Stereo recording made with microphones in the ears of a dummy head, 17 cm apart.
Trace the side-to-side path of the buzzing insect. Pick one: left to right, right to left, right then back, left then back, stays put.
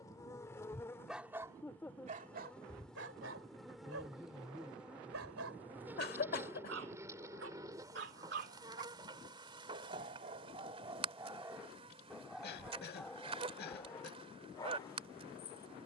left to right.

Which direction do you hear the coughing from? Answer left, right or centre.
left.